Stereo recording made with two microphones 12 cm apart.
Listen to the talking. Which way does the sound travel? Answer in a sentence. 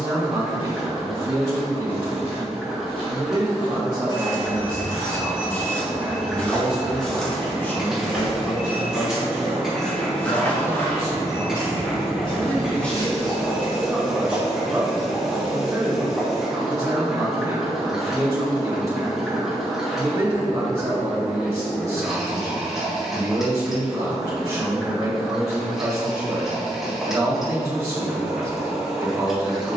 You can hear the talking go left and come back.